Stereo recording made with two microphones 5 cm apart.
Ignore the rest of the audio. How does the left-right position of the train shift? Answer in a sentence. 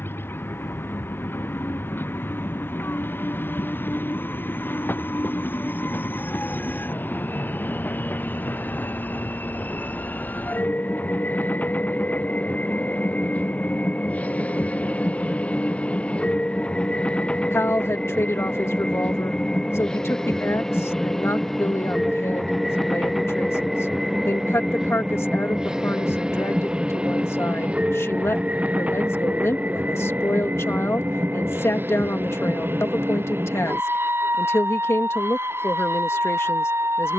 You can hear the train move to the right.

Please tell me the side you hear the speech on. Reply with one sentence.
In this clip you hear the speech on the left.